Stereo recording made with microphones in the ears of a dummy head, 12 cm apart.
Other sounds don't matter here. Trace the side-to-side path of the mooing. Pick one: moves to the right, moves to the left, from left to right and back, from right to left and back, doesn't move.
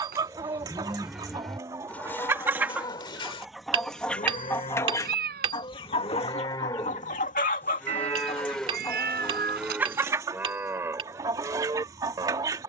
from right to left and back.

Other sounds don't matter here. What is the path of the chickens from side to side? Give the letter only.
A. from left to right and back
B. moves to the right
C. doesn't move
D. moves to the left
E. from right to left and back
E.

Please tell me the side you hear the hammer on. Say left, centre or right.
right.